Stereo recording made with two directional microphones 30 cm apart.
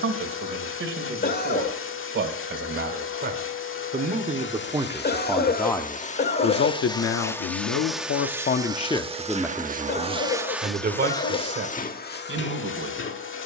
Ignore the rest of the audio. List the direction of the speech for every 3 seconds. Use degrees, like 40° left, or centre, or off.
40° right, 10° right, 50° left, 20° right, 40° right.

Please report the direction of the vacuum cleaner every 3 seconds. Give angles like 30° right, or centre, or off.
40° left, 40° left, 10° left, centre, 40° left.